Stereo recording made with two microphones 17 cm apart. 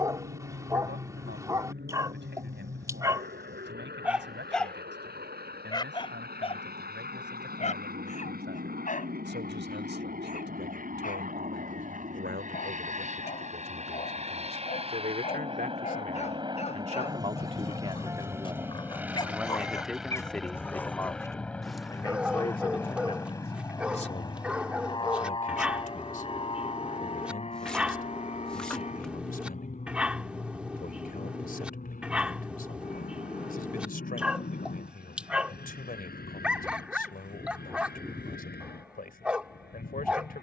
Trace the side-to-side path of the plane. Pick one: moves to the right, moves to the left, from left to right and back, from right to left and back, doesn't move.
moves to the left.